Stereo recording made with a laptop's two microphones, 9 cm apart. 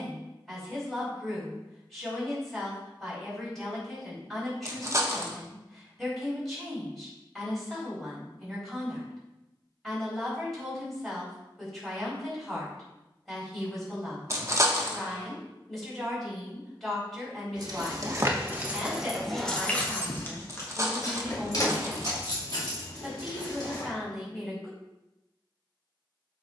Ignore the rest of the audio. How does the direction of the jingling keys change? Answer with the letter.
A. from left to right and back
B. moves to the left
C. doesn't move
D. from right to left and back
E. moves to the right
B.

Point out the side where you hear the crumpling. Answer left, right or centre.
right.